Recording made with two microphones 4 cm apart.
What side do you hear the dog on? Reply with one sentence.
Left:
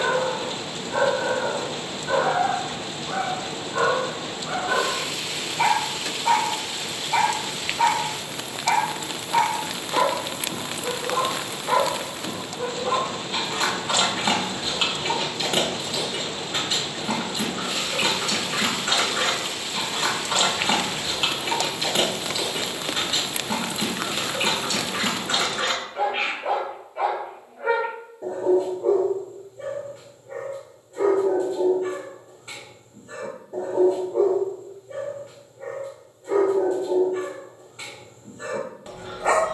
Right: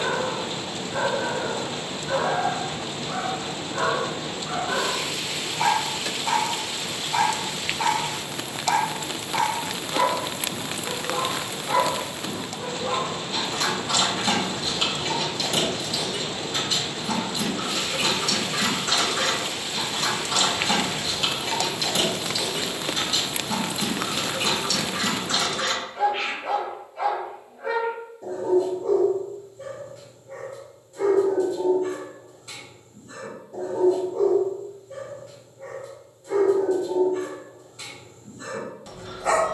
In this clip you hear the dog on the left.